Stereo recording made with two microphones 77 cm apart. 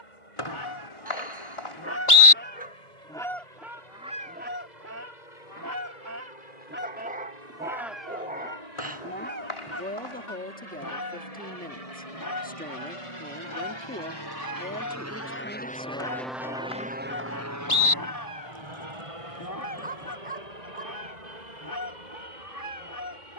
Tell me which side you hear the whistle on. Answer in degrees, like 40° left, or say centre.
40° left.